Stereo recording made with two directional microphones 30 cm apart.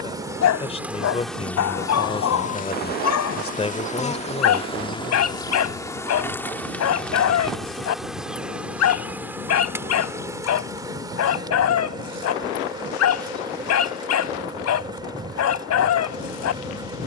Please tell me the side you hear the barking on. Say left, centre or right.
left.